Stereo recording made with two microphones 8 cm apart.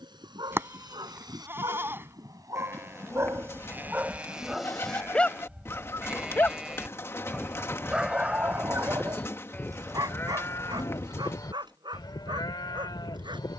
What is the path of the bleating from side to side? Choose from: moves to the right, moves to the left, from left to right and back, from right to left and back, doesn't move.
moves to the left.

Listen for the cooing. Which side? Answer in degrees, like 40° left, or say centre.
30° left.